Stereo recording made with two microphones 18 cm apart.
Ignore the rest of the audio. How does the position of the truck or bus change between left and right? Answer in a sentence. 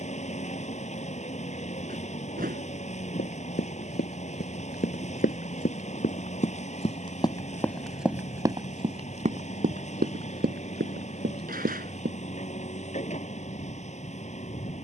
You can hear the truck or bus stay put.